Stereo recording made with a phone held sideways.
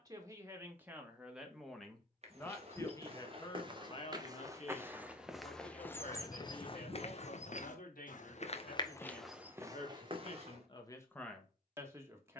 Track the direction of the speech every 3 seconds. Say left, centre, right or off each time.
centre, left, left, left.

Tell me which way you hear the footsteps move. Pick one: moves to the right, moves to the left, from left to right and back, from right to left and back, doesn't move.
from right to left and back.